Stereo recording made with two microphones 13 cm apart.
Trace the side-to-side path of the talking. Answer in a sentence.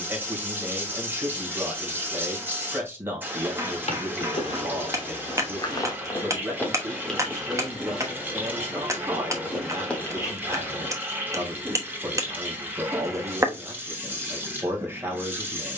In this clip you hear the talking stay in one place.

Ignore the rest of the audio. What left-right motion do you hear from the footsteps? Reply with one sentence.
In this clip you hear the footsteps move from left to right and back again.